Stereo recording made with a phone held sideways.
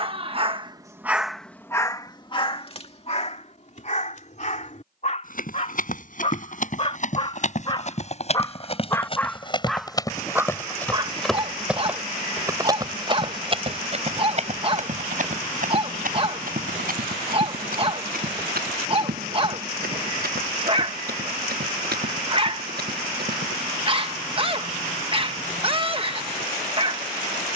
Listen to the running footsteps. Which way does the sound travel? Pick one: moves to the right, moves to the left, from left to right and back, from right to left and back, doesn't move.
moves to the right.